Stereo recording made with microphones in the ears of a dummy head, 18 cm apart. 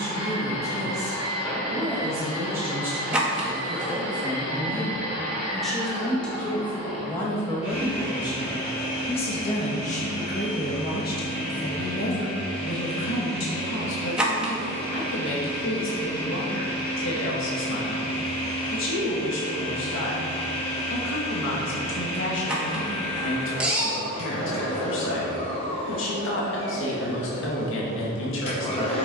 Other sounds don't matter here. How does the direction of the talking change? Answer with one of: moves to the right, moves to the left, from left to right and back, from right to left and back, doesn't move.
moves to the left.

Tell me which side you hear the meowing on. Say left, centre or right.
centre.